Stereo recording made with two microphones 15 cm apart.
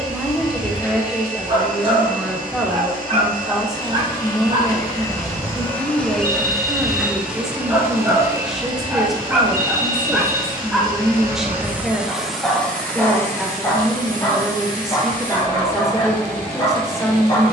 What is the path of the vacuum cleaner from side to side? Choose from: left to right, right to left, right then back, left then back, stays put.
right then back.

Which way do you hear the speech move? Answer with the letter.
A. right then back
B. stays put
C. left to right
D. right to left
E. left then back
B.